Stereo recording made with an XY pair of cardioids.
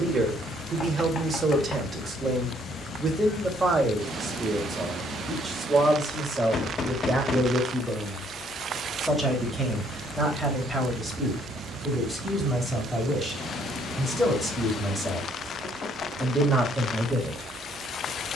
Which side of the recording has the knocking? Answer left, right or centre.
left.